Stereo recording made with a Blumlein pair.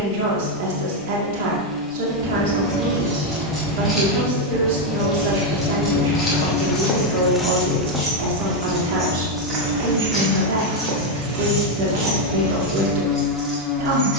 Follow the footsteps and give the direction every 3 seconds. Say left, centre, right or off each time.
off, off, centre, right, right.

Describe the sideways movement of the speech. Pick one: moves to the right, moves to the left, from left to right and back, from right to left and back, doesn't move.
doesn't move.